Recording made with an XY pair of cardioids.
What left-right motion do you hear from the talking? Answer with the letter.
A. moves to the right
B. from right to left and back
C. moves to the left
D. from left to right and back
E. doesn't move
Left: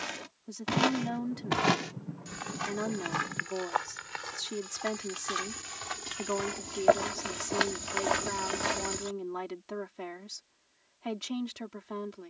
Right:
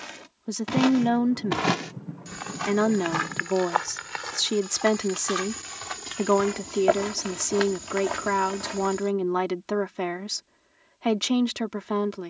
E.